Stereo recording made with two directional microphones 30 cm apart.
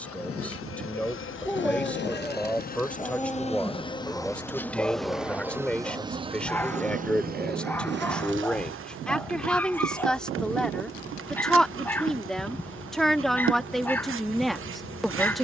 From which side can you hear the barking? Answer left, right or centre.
centre.